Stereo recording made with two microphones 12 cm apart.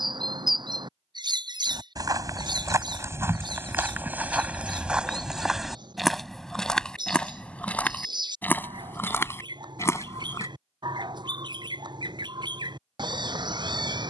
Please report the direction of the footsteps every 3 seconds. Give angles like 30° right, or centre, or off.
30° right, 10° right, 10° left, 20° left, off.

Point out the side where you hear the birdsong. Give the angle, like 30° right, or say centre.
40° right.